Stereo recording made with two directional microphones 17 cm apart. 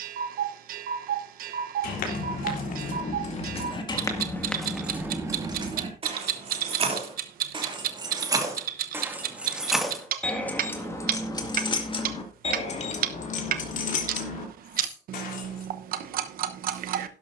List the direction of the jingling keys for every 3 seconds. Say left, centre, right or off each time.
left, centre, right, centre, left, left.